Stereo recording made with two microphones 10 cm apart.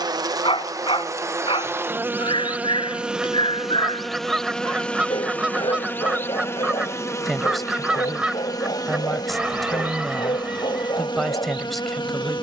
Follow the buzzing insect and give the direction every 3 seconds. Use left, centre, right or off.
right, centre, left, left.